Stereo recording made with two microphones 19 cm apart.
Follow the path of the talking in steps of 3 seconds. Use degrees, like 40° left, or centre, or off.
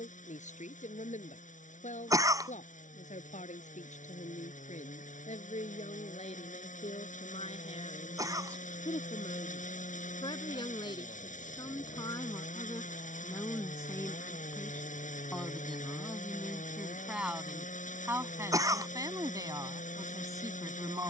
40° left, 40° left, 30° left, 30° left, 10° left, centre, 20° right.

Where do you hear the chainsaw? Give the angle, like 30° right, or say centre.
40° left.